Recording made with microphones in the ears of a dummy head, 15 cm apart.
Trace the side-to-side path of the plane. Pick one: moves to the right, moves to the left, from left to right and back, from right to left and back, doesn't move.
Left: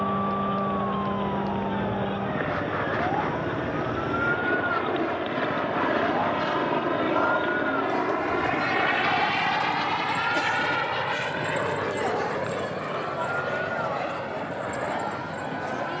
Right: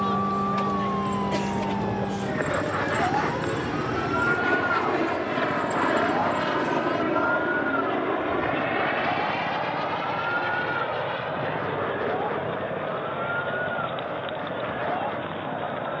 moves to the left.